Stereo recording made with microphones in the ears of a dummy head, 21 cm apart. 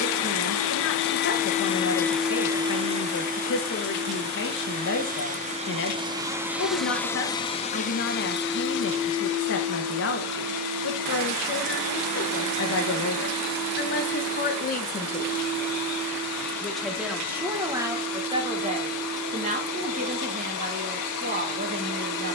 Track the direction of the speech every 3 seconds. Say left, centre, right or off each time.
left, left, left, left, left, centre, right, right.